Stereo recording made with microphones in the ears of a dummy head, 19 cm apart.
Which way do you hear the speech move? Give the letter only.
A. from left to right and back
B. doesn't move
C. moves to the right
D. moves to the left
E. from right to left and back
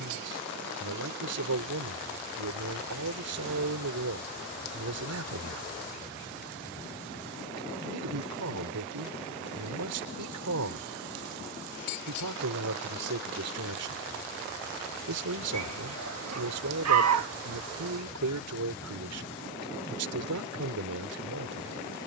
B.